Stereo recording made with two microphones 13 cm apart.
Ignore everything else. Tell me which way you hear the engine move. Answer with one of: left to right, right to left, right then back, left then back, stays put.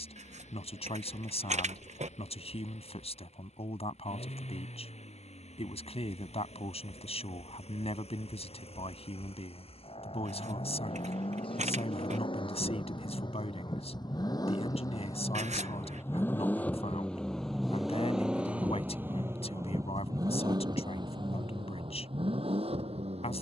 left to right.